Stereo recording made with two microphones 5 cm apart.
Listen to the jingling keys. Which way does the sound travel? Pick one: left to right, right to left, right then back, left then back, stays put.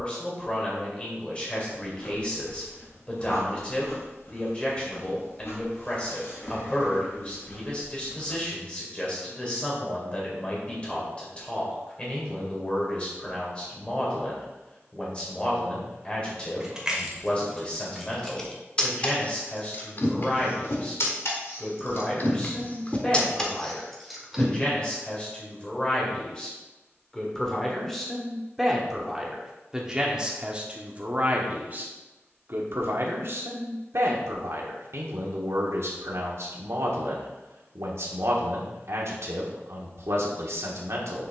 left then back.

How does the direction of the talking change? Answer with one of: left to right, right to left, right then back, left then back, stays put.
left to right.